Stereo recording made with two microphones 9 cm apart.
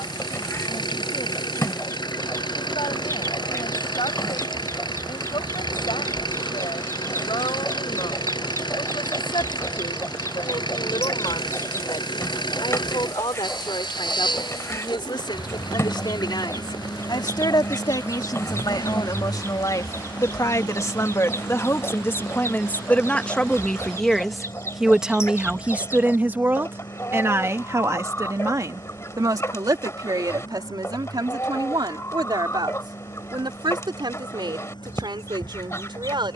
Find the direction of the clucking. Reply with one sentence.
You can hear the clucking on the left.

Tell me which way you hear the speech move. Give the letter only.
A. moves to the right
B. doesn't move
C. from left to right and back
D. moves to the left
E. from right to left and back
A.